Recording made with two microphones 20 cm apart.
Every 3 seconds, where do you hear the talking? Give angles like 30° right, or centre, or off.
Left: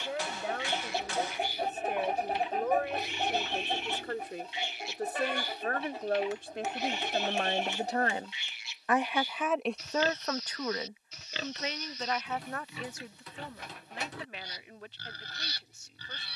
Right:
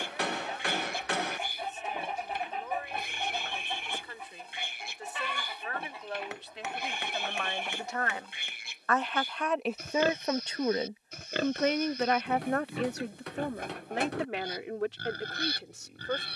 60° left, 60° left, 40° left, 20° right, 70° right, 80° right.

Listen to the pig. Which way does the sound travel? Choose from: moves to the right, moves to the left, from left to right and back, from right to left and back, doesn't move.
doesn't move.